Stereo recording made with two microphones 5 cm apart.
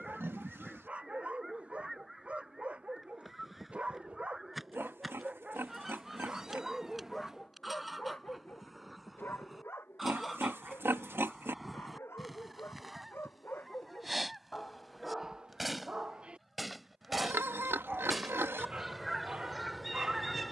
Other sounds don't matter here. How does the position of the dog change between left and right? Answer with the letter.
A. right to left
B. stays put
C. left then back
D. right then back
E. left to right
C.